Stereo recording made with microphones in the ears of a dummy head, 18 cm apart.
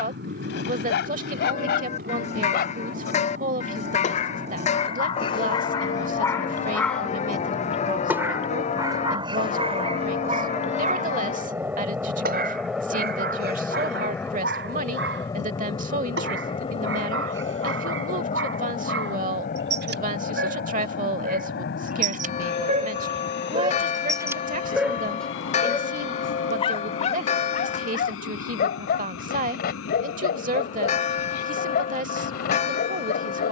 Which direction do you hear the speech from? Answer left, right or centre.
right.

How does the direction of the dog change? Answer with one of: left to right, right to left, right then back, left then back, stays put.
right then back.